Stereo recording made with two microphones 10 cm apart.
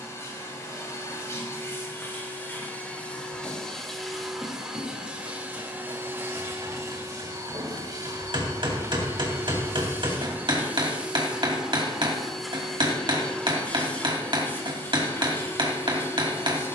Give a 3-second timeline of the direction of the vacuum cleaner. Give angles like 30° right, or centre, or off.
30° left, 10° right, 40° right, 20° right, 10° left, 30° left.